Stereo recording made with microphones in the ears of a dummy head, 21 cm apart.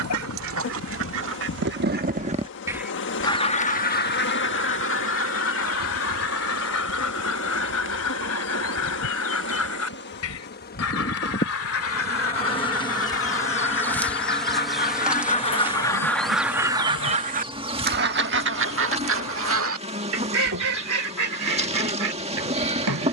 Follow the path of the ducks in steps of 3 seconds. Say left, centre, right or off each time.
right, left, left, left, left, centre, right, right.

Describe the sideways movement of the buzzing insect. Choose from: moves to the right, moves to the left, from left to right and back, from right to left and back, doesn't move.
moves to the right.